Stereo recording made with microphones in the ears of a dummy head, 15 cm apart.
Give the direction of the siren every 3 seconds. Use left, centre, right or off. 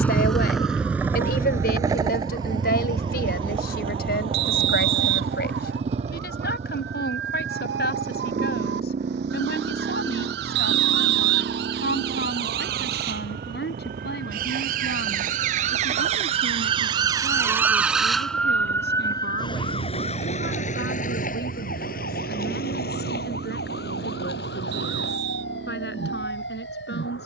right, right, right, right, right, right, left, left, left.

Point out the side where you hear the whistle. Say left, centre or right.
right.